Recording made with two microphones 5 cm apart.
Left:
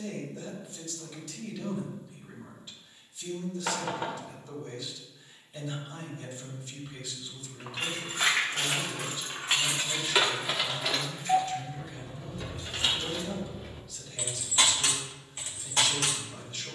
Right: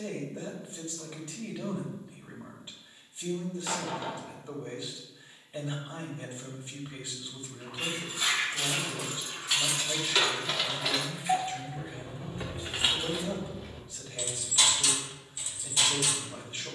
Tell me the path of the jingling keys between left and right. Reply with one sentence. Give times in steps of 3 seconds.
You can hear the jingling keys not at all from 0 s, on the left from 6 s, in the centre from 9 s and on the left from 15 s.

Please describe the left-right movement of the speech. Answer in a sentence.
You can hear the speech stay put.